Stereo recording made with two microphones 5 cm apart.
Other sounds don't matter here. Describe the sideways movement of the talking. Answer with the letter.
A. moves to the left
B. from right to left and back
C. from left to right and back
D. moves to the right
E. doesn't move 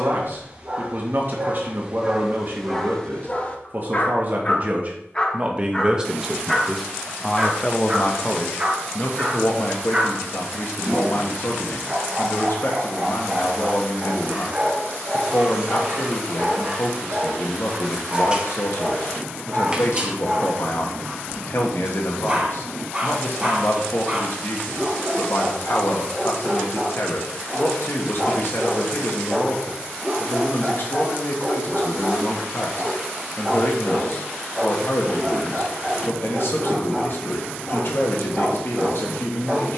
A.